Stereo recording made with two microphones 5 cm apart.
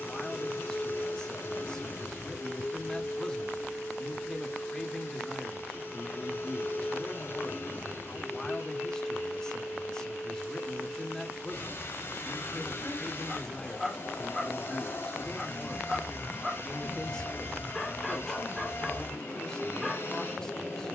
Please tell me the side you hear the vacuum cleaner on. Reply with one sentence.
In this clip you hear the vacuum cleaner on the left.